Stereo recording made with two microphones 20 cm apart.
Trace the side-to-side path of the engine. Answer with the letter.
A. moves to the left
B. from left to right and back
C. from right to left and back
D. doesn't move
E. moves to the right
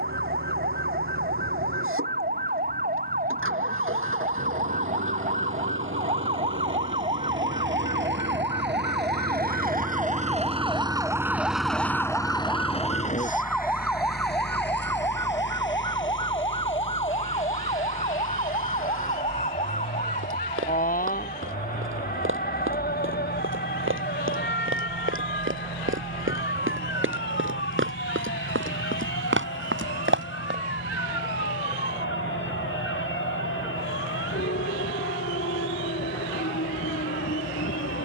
A.